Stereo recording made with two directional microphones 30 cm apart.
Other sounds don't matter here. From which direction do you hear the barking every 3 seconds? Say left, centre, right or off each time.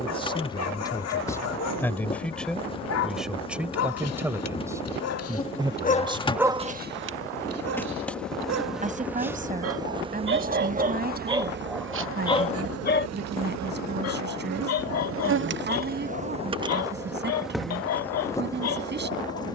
left, left, right, right, left, left, left.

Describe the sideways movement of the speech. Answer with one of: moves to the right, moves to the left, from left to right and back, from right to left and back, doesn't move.
moves to the right.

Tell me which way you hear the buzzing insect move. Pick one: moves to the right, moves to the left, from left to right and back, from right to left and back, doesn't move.
from left to right and back.